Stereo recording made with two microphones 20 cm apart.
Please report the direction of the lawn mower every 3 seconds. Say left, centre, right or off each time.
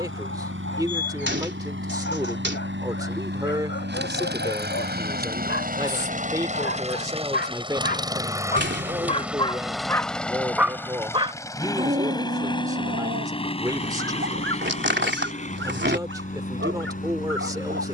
right, right, right, centre, left, left.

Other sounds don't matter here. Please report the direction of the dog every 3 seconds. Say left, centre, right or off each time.
left, left, left, centre, right, right.